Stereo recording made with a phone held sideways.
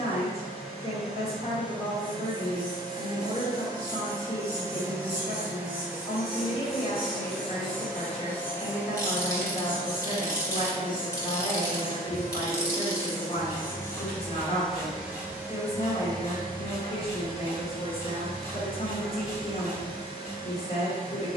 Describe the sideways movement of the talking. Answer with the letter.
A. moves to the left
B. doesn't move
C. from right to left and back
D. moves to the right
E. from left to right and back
B.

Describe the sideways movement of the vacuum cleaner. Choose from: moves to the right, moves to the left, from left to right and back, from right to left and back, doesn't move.
from right to left and back.